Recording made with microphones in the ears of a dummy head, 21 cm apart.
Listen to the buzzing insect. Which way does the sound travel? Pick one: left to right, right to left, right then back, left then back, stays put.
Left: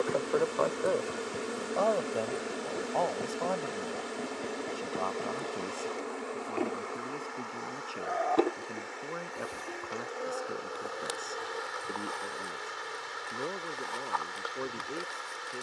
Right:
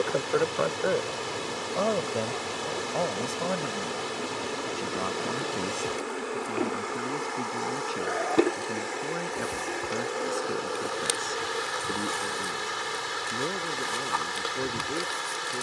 left to right.